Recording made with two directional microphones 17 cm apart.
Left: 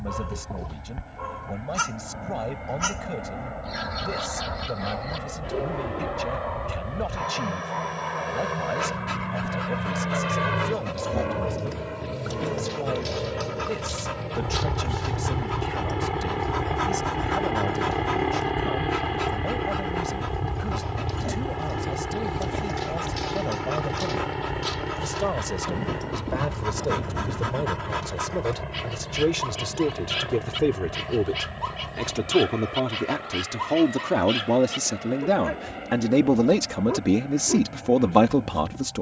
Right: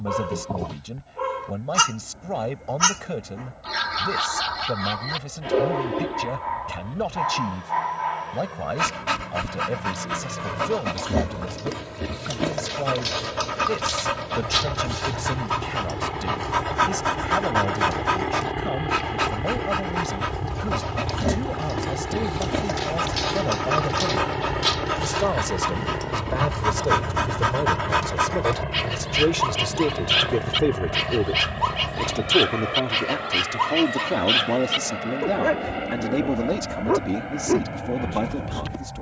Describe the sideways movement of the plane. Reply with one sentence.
You can hear the plane move from left to right.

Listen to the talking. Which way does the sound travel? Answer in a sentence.
In this clip you hear the talking go from the right side to the left.